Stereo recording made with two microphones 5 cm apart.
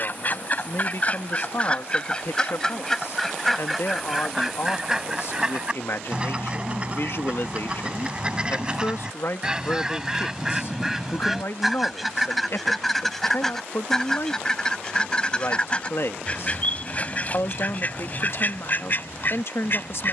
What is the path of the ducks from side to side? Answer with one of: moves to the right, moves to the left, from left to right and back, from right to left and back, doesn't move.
from left to right and back.